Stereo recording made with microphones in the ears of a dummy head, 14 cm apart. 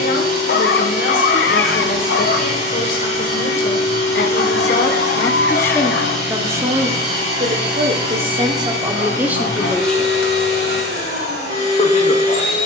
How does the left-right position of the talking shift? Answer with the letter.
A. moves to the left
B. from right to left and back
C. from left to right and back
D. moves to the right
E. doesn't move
C.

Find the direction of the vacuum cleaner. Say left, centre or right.
right.